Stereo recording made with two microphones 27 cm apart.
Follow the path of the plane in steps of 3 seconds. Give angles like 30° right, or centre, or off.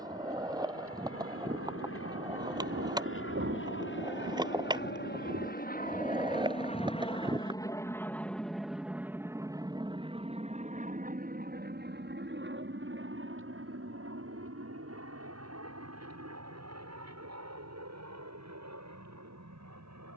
60° left, 40° left, 10° left, 20° right, 50° right, 60° right, 70° right.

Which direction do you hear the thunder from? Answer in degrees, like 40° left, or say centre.
50° right.